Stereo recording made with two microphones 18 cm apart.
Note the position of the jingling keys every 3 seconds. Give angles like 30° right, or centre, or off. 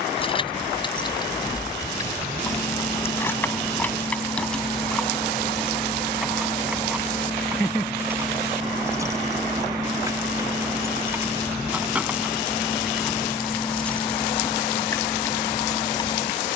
20° left, centre, 10° right, 10° right, centre, 20° left.